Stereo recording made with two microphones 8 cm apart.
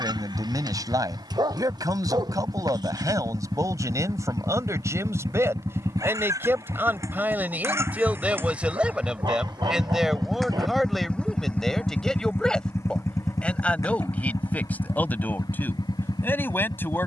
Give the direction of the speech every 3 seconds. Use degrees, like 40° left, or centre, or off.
50° right, 40° right, 20° right, centre, 10° left, 30° left.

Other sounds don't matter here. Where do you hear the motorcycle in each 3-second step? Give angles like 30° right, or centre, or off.
70° right, 60° right, 40° right, centre, 40° left, 60° left.